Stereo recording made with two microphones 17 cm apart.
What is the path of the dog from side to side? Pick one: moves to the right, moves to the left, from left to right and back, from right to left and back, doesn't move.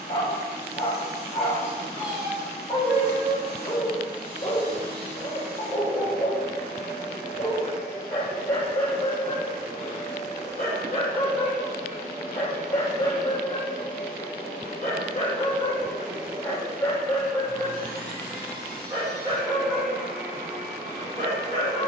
moves to the right.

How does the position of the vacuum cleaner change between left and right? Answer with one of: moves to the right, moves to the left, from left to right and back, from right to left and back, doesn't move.
from right to left and back.